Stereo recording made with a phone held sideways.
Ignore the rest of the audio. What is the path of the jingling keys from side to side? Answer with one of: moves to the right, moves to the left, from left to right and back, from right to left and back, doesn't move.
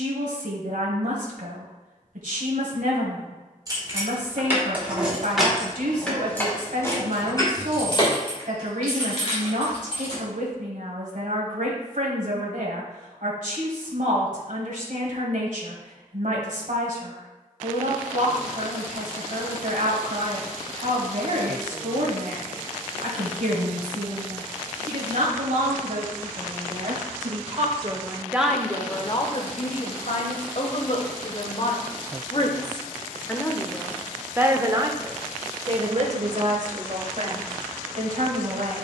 moves to the left.